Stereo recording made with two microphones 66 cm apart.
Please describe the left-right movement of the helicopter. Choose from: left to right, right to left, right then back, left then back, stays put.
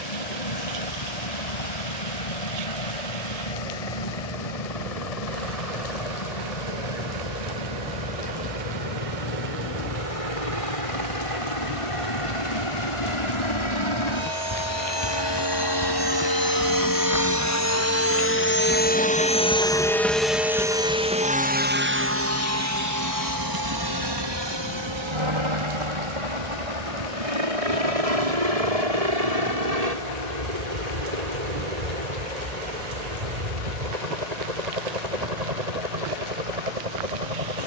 left to right.